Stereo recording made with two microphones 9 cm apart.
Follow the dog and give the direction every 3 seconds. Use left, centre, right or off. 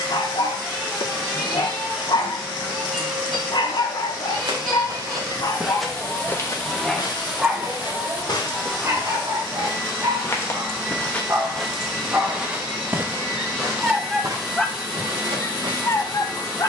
left, left, centre, right, centre, left.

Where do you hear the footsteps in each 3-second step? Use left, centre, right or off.
off, right, left, left, right, right.